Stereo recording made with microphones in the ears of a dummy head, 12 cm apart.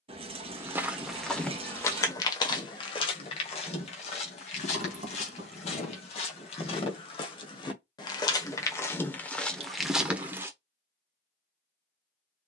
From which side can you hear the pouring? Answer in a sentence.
In this clip you hear the pouring on the right.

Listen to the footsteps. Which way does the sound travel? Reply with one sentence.
In this clip you hear the footsteps go left and come back.